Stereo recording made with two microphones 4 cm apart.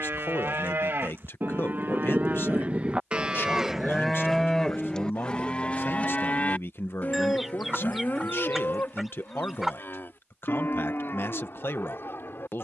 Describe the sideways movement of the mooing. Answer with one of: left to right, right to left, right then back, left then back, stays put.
right to left.